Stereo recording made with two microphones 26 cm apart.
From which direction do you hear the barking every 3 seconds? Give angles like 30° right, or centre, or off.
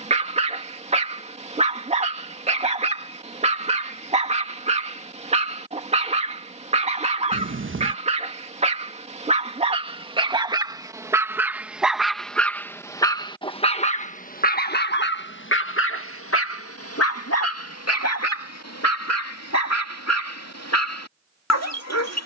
20° right, 20° right, 20° right, 20° right, 20° left, 60° left, 80° left, 80° left.